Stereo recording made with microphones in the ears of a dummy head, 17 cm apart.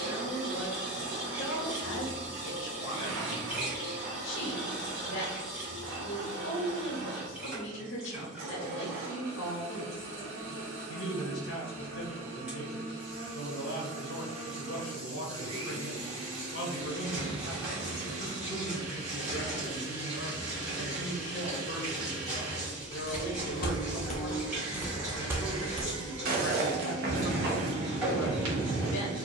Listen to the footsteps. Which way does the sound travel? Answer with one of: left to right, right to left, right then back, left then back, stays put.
left to right.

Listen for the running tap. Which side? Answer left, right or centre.
centre.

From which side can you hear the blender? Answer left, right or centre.
right.